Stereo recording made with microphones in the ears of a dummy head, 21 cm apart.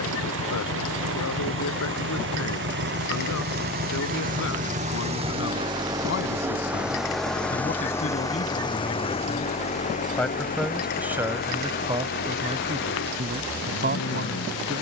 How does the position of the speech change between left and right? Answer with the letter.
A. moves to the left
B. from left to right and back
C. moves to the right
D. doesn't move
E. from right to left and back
C.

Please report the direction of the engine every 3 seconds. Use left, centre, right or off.
right, right, centre, left, left.